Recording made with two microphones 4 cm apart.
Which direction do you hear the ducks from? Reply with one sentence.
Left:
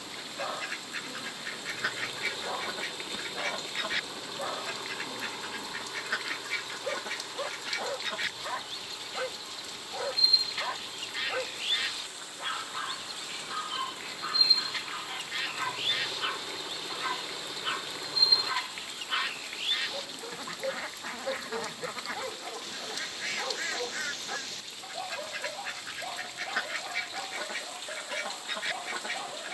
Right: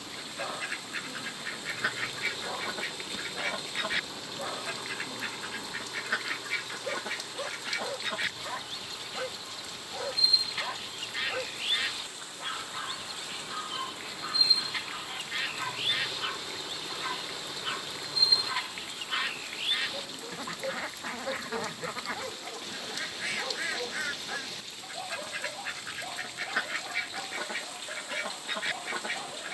You can hear the ducks in the centre.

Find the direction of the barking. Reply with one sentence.
You can hear the barking in the centre.